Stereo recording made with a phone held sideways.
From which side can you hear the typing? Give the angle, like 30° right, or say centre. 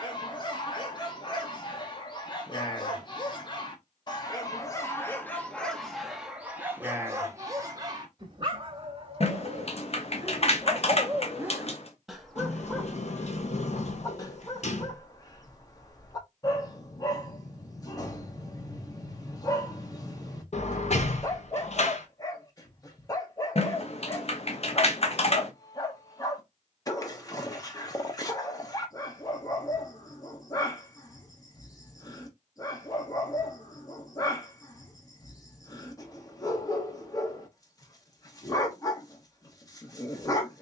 50° left.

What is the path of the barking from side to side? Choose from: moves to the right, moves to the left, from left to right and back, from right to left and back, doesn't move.
from left to right and back.